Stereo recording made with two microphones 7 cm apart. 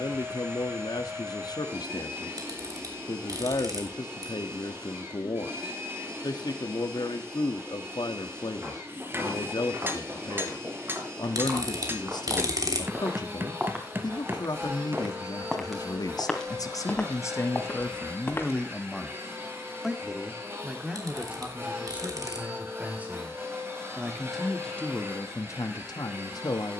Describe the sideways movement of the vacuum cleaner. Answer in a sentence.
You can hear the vacuum cleaner stay in one place.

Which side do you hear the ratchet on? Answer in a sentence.
You can hear the ratchet on the right.